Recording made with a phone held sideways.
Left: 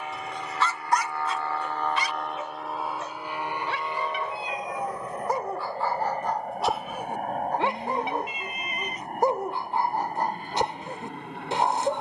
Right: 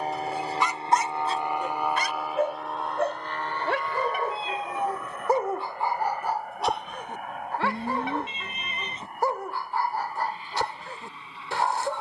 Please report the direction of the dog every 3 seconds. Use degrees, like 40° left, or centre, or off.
30° right, 40° right, 10° left, 20° left.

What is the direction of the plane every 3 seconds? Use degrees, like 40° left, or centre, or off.
20° right, 20° left, 40° left, 50° left.